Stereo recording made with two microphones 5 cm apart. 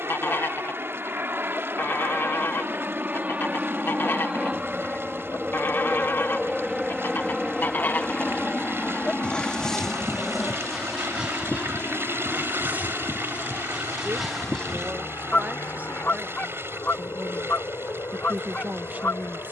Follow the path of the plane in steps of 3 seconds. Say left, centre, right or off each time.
right, right, centre, left, left, left, left.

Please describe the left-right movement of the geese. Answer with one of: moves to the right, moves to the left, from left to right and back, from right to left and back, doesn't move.
from left to right and back.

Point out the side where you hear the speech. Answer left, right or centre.
right.